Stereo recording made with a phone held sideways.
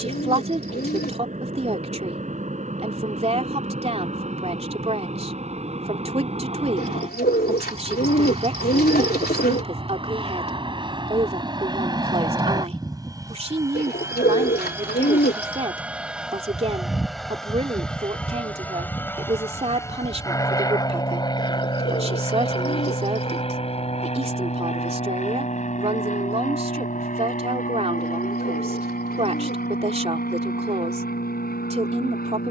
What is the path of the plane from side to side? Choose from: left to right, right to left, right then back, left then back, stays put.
right to left.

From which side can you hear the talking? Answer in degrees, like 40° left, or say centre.
40° right.